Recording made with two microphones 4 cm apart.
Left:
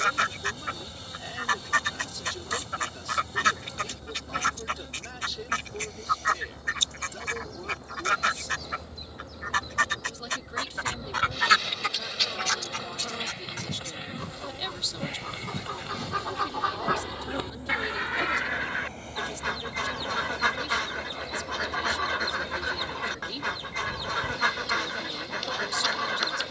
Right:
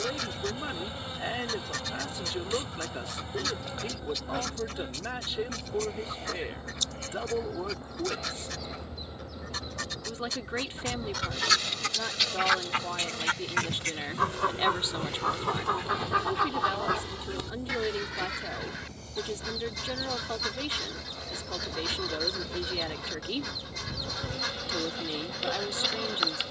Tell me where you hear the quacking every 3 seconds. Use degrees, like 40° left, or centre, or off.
50° left, 50° left, 50° left, 40° left, 40° right, 10° right, 40° left, 40° left, 40° left.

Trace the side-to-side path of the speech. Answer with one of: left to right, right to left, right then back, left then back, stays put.
stays put.